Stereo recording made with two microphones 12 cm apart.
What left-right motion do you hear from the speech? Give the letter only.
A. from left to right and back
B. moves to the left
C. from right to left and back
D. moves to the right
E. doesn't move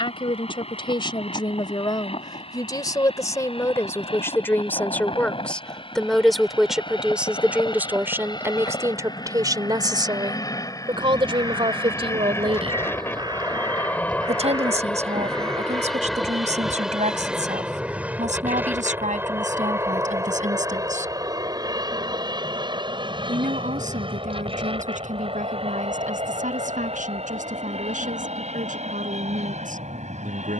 D.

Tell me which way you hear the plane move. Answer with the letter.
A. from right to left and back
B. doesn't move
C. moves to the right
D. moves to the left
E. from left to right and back
C.